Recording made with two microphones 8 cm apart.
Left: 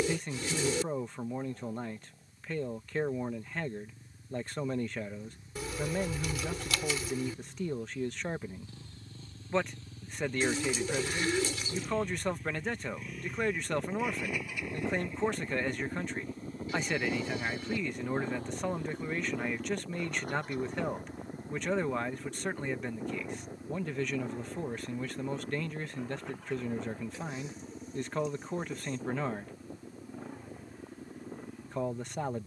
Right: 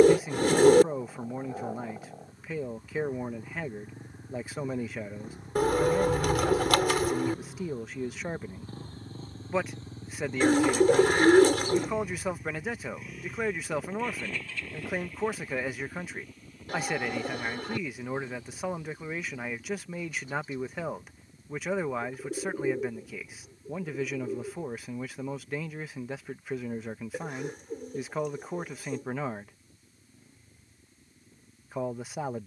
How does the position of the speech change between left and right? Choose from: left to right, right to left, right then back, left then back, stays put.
stays put.